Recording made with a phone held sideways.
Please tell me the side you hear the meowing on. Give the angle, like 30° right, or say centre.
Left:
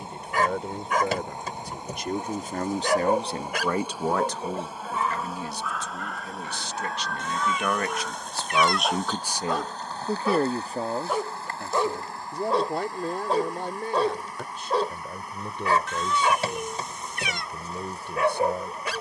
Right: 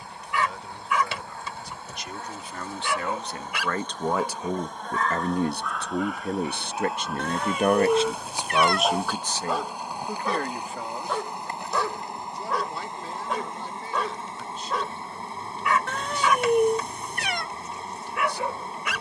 60° right.